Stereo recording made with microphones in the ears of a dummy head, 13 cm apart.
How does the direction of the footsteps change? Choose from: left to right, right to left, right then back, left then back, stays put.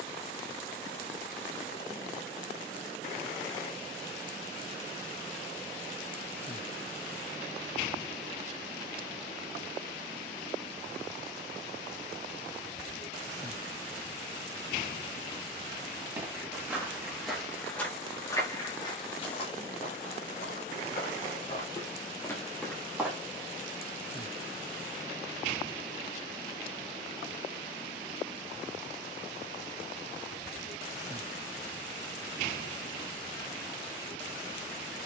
left then back.